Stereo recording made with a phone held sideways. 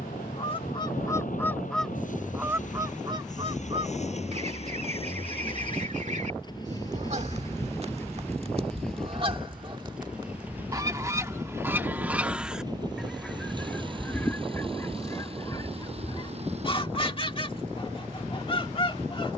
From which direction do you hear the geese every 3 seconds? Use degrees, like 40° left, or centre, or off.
10° left, 50° right, 50° right, 30° right, 10° left, 30° left, 30° left.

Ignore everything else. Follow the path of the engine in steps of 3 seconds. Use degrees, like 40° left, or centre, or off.
60° left, 50° left, 20° left, 10° right, 30° right, 40° right, 50° right.